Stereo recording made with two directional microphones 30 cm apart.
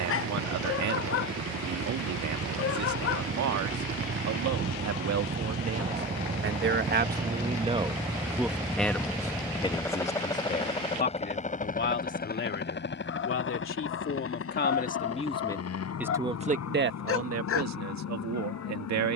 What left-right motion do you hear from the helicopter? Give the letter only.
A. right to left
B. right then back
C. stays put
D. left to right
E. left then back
A.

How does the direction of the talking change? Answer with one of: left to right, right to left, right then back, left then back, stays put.
left then back.